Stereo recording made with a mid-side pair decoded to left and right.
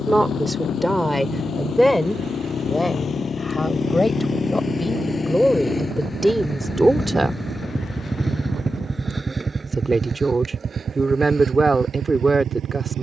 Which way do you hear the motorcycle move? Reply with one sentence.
In this clip you hear the motorcycle go from the left side to the right.